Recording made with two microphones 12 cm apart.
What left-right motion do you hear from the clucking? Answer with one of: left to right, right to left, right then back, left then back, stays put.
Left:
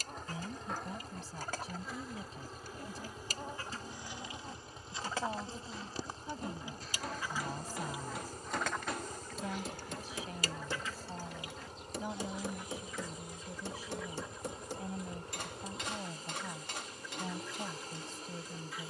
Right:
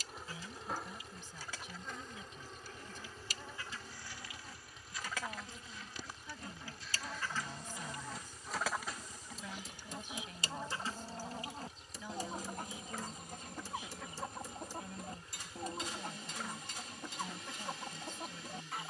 left to right.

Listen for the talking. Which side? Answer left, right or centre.
left.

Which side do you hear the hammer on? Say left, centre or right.
left.